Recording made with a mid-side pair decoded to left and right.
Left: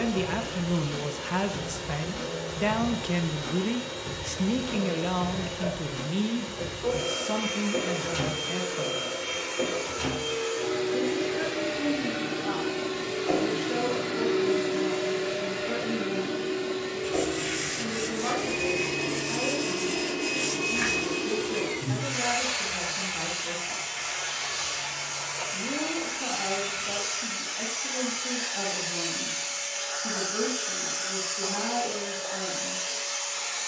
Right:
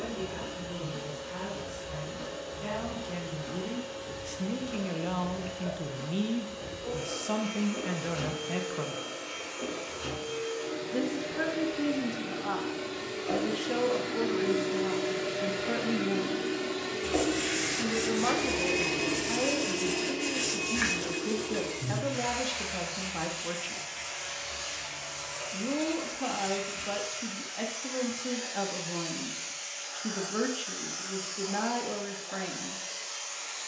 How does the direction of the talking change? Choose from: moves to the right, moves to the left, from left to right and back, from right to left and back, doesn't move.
moves to the right.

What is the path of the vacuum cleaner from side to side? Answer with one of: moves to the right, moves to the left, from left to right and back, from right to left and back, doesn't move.
from left to right and back.